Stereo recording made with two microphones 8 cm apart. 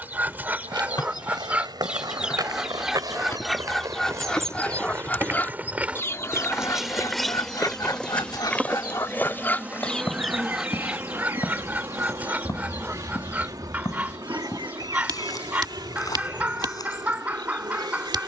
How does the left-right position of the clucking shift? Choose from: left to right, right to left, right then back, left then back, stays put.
left then back.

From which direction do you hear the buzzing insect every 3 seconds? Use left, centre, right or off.
left, left, centre, right, right, right.